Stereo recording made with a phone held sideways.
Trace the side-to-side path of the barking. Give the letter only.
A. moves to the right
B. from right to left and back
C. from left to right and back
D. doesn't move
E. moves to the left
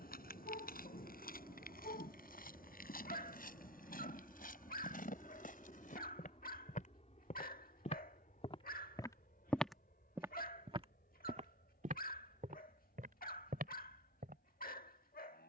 D.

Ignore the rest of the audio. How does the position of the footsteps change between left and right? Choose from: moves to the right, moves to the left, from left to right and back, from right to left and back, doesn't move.
moves to the right.